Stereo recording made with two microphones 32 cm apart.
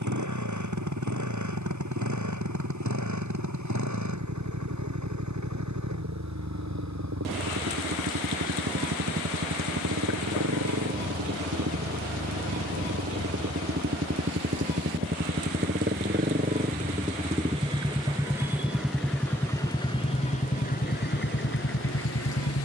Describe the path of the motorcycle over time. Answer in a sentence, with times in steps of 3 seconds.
In this clip you hear the motorcycle on the right from 0 s, in the centre from 18 s and on the left from 21 s.